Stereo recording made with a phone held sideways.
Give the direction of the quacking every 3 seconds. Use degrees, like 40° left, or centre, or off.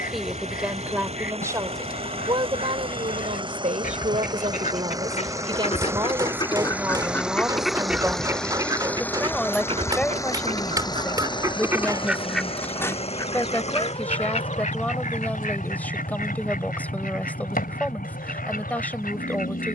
70° left, 60° left, centre, 30° right, 30° left, 70° left, 70° left.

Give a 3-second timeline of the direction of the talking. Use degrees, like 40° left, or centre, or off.
20° right, 40° right, 10° right, 10° left, 10° left, 10° left, 10° left.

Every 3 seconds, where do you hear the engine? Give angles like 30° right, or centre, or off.
40° right, 20° right, centre, 20° left, 40° left, 60° left, 60° left.